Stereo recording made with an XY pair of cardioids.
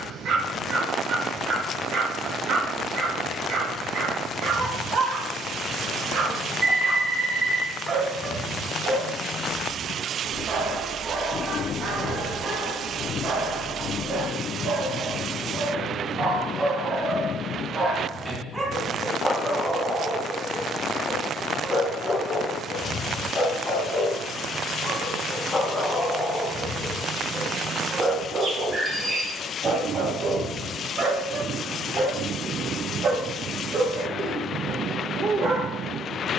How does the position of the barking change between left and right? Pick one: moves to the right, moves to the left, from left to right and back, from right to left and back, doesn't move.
from right to left and back.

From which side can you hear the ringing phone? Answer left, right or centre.
right.